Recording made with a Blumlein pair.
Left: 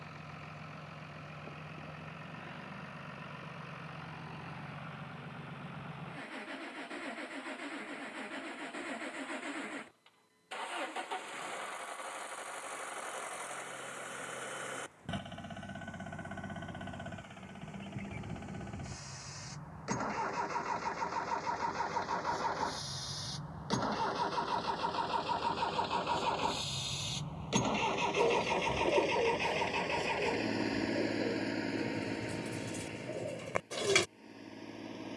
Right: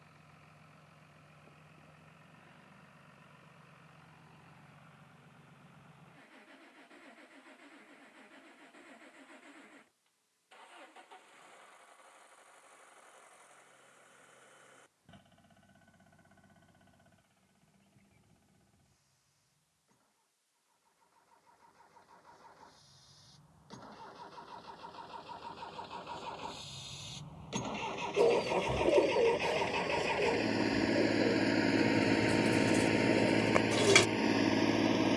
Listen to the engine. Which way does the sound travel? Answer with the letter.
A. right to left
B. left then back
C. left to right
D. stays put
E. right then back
C.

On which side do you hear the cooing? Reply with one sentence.
In this clip you hear the cooing in the centre.